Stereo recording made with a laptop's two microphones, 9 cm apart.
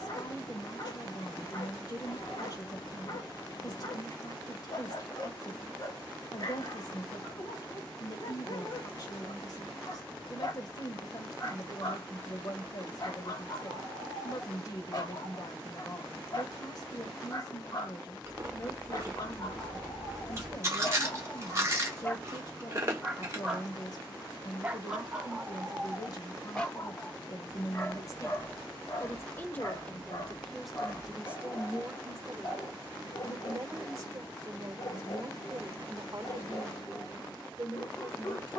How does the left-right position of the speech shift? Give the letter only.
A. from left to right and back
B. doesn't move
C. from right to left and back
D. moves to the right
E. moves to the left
D.